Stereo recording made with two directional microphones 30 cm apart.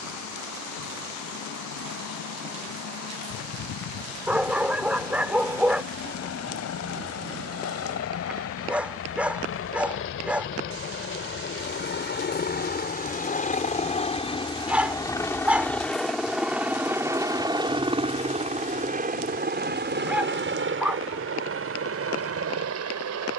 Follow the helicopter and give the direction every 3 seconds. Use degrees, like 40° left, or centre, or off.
70° left, 60° left, 50° left, 40° left, 20° left, centre, 30° right, 50° right.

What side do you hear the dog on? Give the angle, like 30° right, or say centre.
centre.